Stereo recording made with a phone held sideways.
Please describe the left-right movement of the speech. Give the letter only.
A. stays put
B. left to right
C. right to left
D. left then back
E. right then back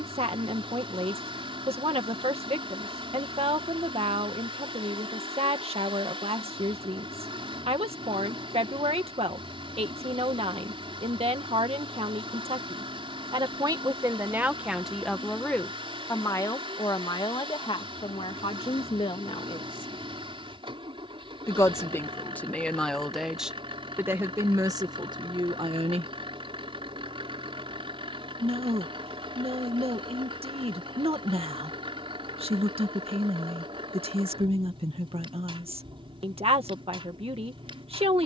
D.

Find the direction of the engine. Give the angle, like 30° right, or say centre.
40° right.